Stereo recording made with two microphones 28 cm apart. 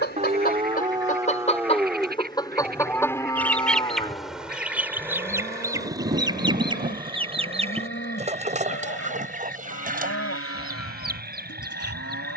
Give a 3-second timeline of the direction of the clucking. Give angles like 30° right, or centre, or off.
20° left, centre, 20° right, 30° right.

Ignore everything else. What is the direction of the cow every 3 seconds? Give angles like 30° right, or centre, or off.
10° right, 20° left, 40° left, 50° left.